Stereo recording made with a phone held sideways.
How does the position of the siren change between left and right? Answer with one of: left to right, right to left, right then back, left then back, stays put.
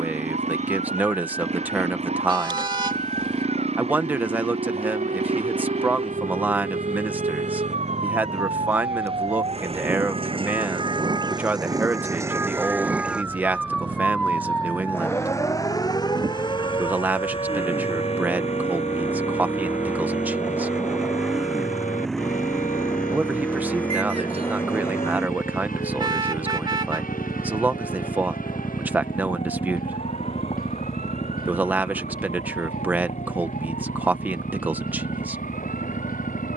right to left.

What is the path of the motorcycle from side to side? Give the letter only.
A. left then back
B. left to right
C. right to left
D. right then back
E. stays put
C.